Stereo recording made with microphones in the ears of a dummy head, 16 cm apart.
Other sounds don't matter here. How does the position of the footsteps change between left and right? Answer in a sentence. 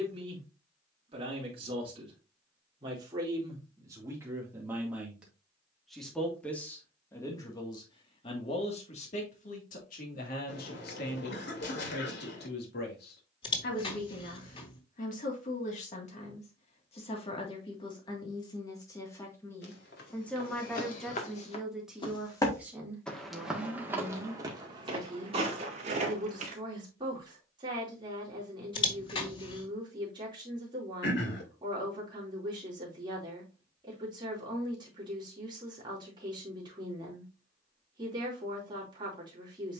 In this clip you hear the footsteps move to the right.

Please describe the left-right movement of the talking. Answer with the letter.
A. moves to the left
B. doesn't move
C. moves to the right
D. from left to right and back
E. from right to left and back
E.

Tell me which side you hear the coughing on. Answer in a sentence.
In this clip you hear the coughing on the left.